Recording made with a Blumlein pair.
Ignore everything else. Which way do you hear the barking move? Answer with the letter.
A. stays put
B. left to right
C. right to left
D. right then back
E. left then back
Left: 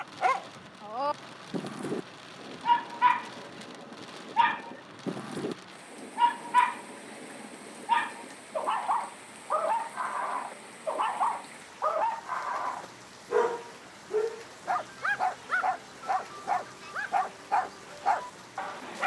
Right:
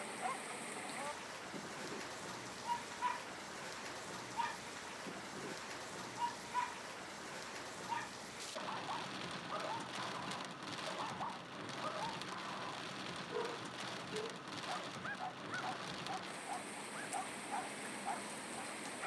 A.